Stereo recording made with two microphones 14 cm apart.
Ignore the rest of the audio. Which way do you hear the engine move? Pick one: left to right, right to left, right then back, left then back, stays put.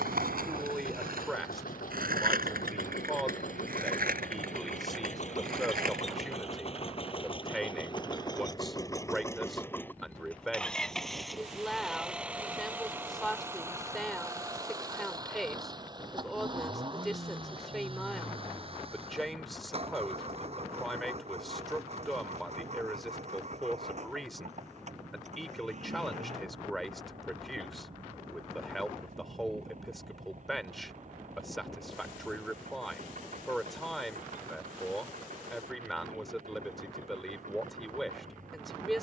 left to right.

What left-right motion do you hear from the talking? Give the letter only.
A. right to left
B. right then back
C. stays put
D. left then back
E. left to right
C.